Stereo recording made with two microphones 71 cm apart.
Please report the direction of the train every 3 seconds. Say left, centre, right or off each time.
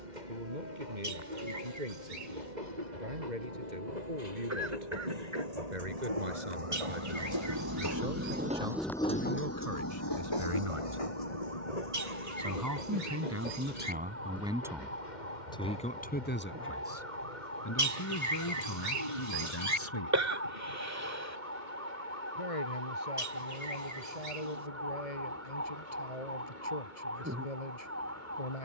right, right, right, left, left, left, left, left, left, left.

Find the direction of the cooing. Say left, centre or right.
right.